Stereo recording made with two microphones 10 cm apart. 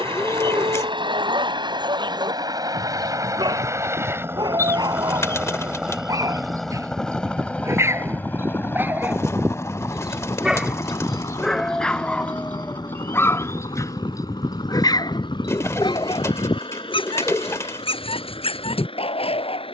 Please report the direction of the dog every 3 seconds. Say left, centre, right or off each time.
right, right, right, centre, left, left, left.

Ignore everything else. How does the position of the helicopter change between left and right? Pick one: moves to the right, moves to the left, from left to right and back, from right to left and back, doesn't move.
moves to the left.